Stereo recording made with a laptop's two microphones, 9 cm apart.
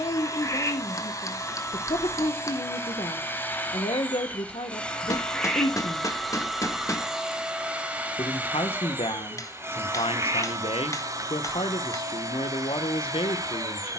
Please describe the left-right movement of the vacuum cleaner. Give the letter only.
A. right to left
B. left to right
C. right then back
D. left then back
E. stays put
B.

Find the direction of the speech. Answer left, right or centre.
left.